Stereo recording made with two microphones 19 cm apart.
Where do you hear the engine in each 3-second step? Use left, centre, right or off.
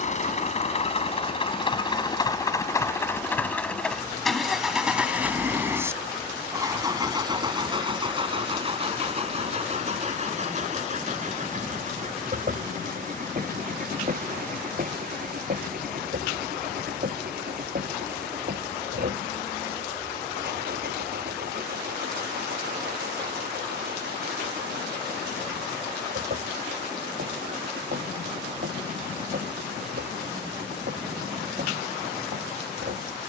left, centre, right, right, right, right, right, right, right, right, right.